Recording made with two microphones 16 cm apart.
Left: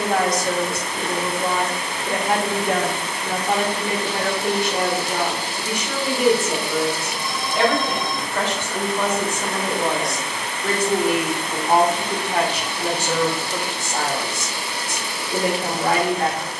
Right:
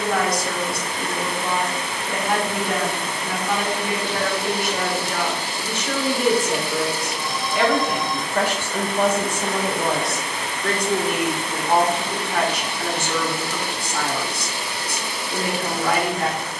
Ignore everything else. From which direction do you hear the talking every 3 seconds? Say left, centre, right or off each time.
left, left, centre, centre, left, left.